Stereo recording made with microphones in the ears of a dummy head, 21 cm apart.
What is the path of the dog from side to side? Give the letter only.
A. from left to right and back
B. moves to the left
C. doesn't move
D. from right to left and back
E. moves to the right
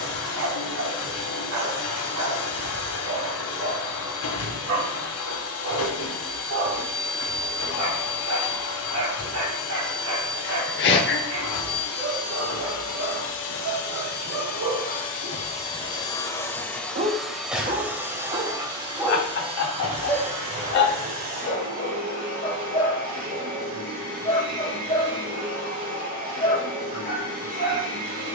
B.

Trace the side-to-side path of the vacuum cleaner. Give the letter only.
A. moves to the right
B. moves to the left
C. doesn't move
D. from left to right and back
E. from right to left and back
A.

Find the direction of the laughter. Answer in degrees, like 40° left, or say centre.
50° left.